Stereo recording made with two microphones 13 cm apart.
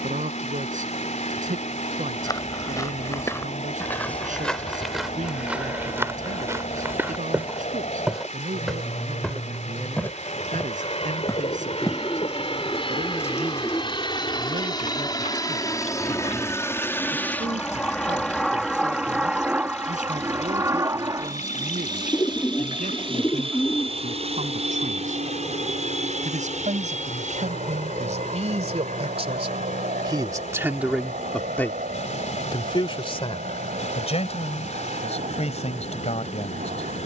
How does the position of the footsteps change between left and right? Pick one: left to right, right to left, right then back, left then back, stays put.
right then back.